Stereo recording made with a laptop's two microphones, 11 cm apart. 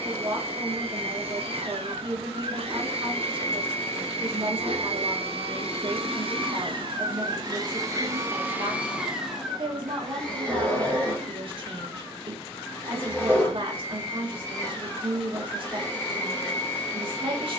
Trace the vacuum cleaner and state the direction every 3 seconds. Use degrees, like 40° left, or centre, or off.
60° right, 60° right, 40° right, 10° left, 20° left, 20° left.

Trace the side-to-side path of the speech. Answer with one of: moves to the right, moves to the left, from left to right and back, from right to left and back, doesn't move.
doesn't move.